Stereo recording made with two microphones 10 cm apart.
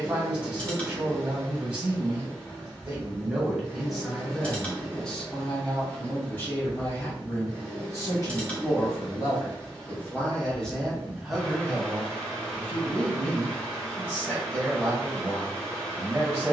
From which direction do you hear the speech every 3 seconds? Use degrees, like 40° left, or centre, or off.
20° right, centre, 30° left, 10° left, 20° right, 20° right.